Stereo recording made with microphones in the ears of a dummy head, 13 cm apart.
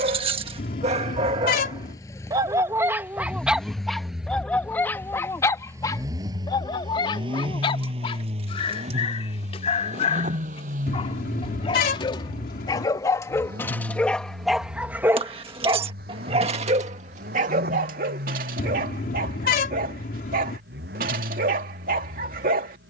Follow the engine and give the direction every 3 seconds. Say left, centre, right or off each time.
left, centre, right, right, right, right, right, right.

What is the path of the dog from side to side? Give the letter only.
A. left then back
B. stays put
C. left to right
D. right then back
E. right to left
A.